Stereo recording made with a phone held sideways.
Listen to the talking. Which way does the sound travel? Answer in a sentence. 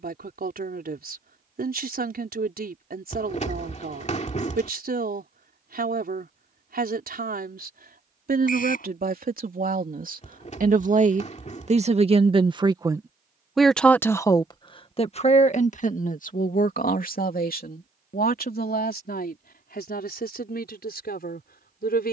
In this clip you hear the talking move to the left.